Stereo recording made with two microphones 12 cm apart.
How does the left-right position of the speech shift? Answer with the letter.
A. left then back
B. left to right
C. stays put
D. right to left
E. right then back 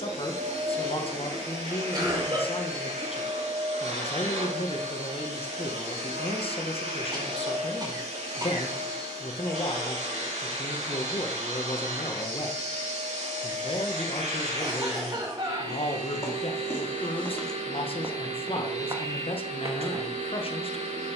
C.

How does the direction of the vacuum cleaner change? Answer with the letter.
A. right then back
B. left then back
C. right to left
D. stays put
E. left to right
D.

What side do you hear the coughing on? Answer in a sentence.
You can hear the coughing on the right.